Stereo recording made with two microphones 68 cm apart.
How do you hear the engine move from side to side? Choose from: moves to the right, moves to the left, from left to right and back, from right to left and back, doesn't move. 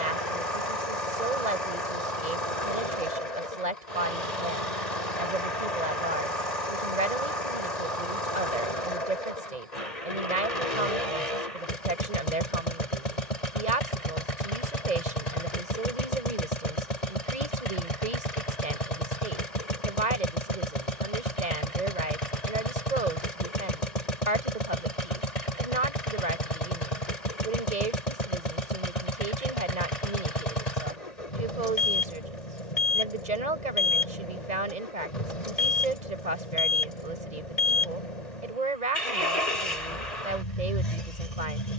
doesn't move.